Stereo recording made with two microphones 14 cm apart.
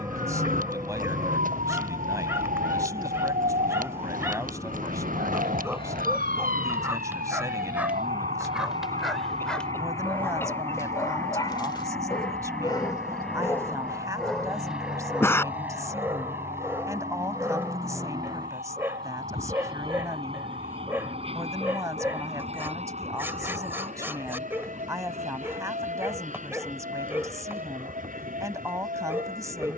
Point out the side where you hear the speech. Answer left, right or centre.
right.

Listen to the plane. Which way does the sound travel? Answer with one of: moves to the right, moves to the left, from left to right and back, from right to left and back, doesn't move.
moves to the right.